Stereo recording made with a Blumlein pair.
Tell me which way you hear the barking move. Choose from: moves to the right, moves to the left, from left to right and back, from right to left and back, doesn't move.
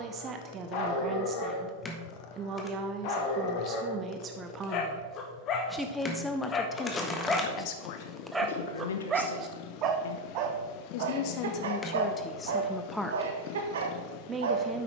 moves to the right.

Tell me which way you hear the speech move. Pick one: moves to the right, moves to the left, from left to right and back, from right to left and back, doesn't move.
from right to left and back.